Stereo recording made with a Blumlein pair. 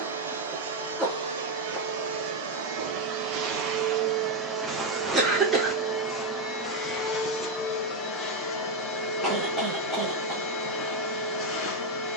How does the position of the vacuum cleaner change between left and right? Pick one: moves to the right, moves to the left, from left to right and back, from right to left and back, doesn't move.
moves to the left.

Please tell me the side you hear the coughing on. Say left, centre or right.
centre.